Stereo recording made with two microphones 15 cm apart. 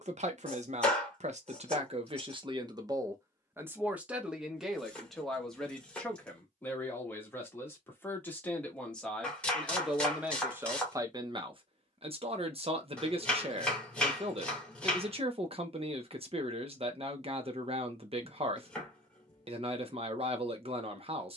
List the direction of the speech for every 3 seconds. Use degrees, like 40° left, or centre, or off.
40° right, centre, 10° left, 10° right, 40° right, 40° right, 40° right.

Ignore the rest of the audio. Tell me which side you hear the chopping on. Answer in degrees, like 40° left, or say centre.
10° left.